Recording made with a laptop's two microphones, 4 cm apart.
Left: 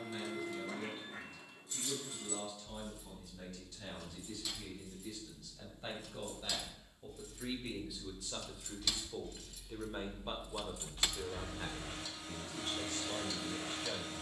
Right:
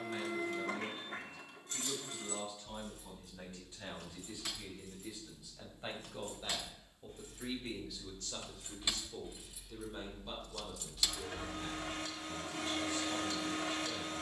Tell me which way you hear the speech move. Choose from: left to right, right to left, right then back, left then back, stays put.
right to left.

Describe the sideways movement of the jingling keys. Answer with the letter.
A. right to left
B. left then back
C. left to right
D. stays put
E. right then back
A.